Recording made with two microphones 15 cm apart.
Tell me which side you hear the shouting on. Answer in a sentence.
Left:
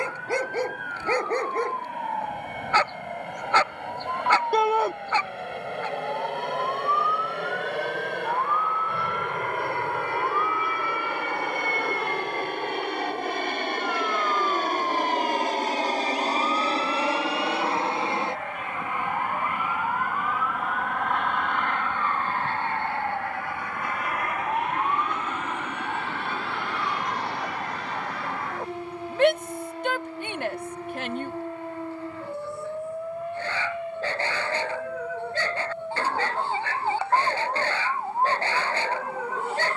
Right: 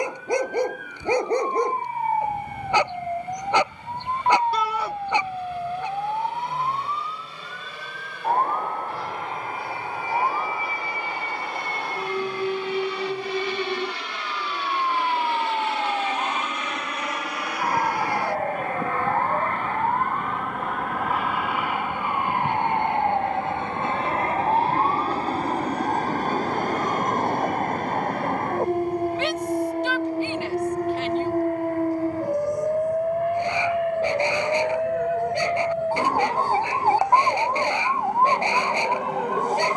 You can hear the shouting on the left.